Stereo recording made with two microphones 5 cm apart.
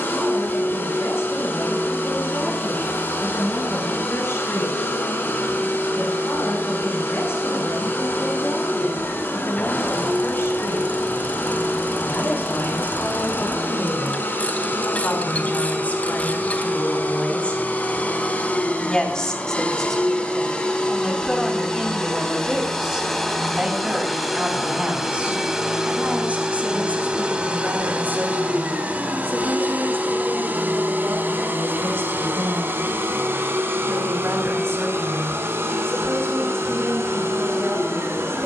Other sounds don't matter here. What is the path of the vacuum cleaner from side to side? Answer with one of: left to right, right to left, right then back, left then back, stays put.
left to right.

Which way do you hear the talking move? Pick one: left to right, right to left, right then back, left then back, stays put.
left to right.